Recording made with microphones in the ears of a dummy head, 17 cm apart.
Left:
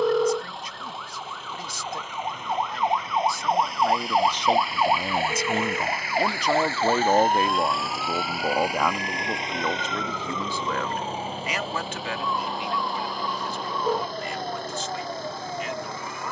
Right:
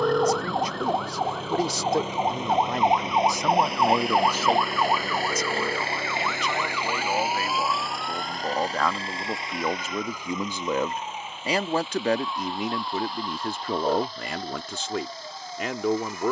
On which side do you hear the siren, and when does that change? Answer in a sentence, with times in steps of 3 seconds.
In this clip you hear the siren on the right from 0 s, in the centre from 3 s and on the left from 6 s.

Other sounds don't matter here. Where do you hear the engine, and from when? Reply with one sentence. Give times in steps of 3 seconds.
You can hear the engine on the right from 0 s, in the centre from 6 s and on the left from 9 s.